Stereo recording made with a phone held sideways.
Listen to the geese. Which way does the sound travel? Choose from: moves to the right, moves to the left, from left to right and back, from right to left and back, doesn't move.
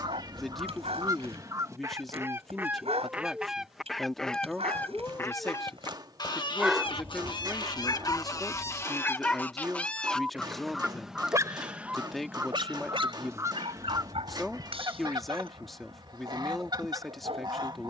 from right to left and back.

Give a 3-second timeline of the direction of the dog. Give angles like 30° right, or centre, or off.
50° right, 50° right, 10° left, 10° right, 40° right, 40° right.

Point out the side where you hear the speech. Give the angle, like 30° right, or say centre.
centre.